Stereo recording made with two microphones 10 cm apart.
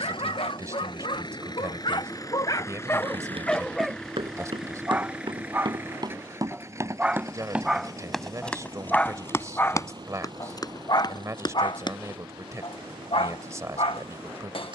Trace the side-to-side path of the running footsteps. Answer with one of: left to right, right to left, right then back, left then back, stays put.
right to left.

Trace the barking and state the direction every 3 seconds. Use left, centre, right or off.
left, centre, centre, left, left.